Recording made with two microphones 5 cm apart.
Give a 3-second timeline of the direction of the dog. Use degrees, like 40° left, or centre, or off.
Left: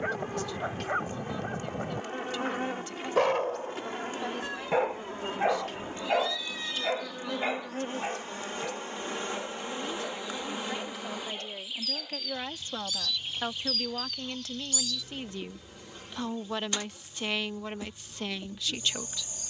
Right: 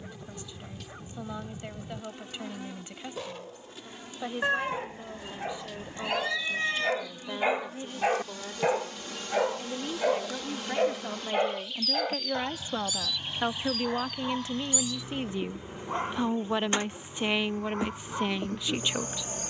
70° left, 50° left, 10° right, 60° right, 70° right, 80° right, 80° right.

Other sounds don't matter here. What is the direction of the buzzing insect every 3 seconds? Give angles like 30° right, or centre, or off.
50° left, 50° left, 40° left, 20° left, 10° right, 30° right, 50° right.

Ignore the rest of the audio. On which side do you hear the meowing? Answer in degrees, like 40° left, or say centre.
50° right.